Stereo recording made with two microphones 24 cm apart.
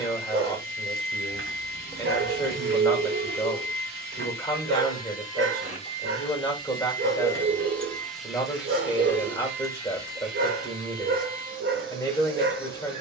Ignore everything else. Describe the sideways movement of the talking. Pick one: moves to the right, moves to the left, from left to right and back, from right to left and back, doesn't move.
doesn't move.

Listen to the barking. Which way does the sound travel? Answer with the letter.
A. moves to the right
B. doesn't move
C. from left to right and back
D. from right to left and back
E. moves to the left
B.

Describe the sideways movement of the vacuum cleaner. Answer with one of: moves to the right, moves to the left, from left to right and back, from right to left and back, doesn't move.
moves to the right.